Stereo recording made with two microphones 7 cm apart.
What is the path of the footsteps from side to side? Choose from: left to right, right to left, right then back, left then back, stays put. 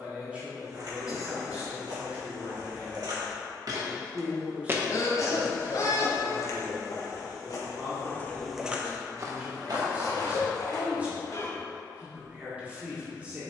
left then back.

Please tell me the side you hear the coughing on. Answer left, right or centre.
left.